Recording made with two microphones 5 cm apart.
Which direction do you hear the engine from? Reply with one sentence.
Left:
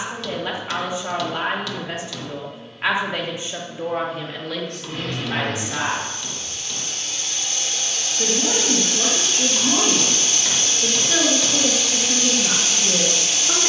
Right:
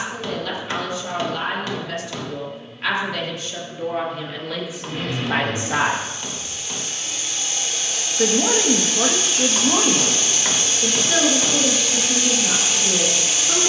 In this clip you hear the engine in the centre.